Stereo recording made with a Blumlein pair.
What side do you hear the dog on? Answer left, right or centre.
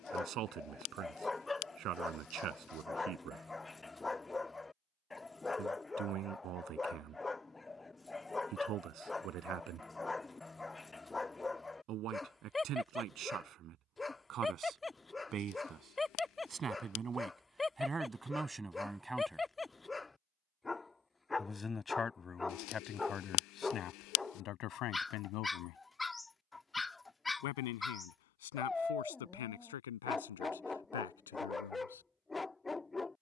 centre.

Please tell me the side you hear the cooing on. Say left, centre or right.
left.